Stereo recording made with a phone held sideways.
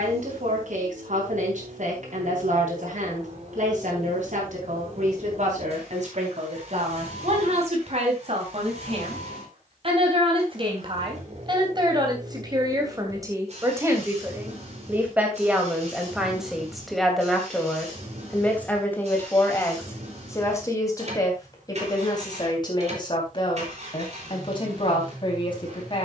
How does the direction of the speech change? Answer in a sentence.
You can hear the speech move from right to left.